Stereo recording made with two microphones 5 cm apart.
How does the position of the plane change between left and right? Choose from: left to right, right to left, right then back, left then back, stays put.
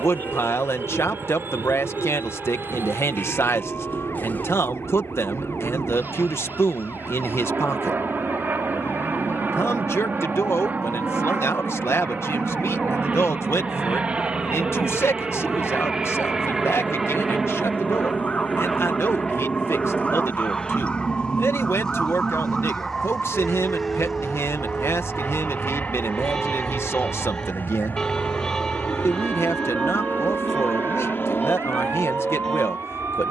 right to left.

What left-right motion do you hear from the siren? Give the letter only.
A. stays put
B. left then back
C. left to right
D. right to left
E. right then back
C.